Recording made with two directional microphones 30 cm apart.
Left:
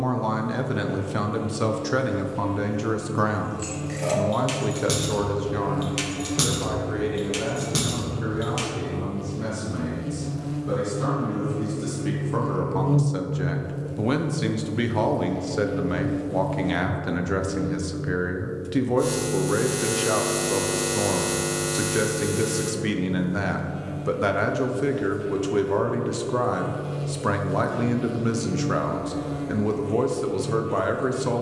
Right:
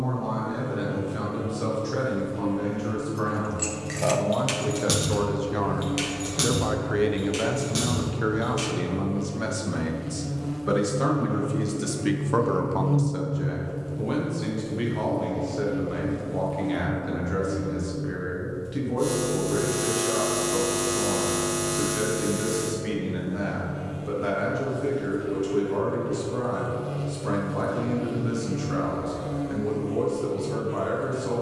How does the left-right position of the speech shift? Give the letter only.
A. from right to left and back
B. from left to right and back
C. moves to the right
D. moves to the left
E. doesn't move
B.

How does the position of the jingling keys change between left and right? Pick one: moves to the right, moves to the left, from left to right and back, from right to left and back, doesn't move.
moves to the left.